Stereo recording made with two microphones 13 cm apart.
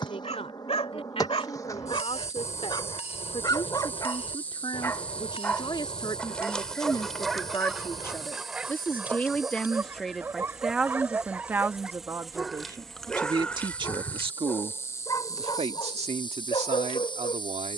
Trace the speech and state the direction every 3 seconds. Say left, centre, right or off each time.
left, left, left, centre, right, right.